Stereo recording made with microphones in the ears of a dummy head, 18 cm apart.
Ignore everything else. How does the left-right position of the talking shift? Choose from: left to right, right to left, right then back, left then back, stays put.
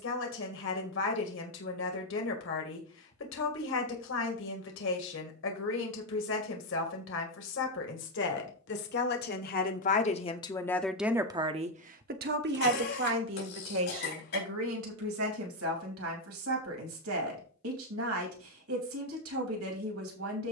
left to right.